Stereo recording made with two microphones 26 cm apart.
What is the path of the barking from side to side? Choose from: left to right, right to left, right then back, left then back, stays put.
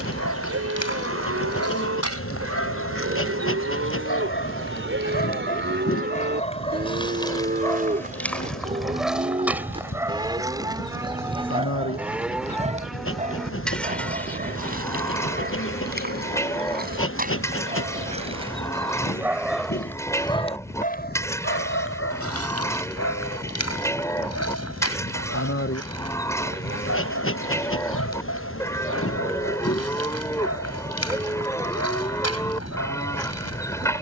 right then back.